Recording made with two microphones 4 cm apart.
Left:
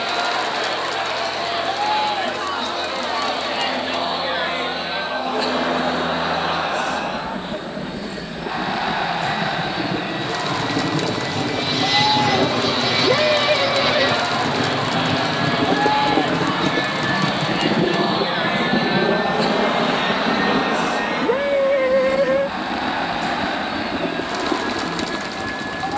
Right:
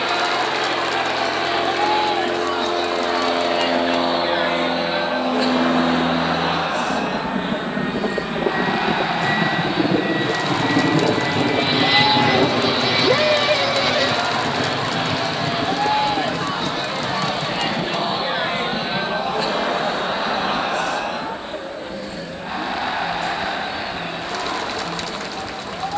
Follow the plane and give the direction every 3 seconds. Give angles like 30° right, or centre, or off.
70° right, 60° right, 50° right, 30° right, centre, 30° left, 50° left, 60° left, 70° left.